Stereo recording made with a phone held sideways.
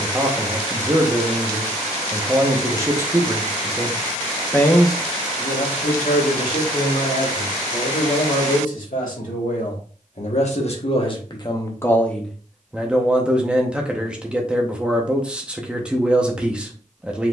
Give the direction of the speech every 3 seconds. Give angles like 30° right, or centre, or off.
20° right, 10° left, 70° left, 50° left, 10° right, 10° right.